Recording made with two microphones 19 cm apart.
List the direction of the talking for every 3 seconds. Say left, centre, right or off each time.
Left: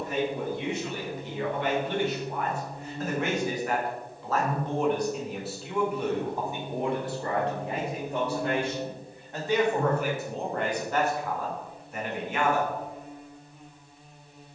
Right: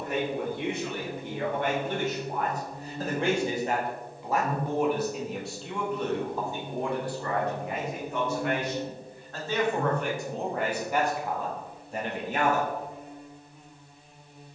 right, centre, left, centre, right.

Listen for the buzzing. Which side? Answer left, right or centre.
centre.